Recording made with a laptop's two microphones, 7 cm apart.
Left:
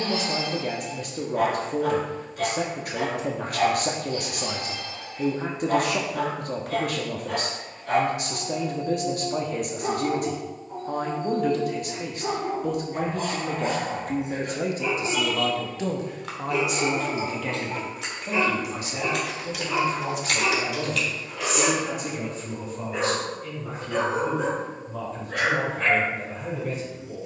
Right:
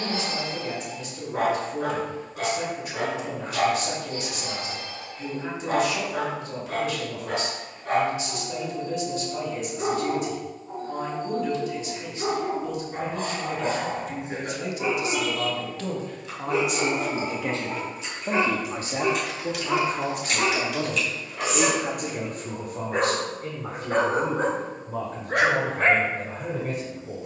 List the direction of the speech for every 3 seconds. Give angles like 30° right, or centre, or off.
50° left, 50° left, 50° left, 50° left, 50° left, 10° left, 40° right, 60° right, 60° right.